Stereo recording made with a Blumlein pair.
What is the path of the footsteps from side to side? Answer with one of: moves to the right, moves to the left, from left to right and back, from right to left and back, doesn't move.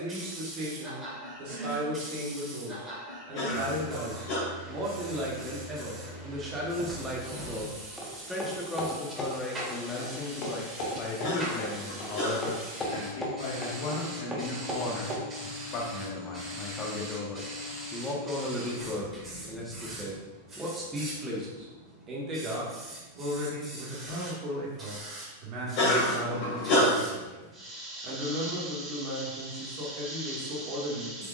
from right to left and back.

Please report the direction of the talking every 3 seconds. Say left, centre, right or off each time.
right, right, centre, left, left, left, centre, right, right, right, right.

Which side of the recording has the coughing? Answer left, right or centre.
left.